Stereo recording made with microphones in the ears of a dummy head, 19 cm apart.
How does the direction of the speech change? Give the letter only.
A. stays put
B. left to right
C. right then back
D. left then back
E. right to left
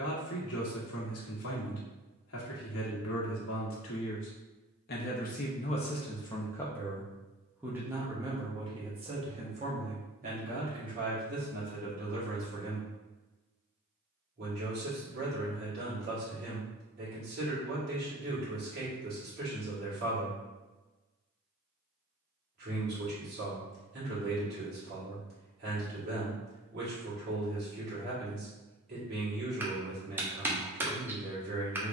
B.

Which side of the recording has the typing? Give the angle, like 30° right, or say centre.
10° right.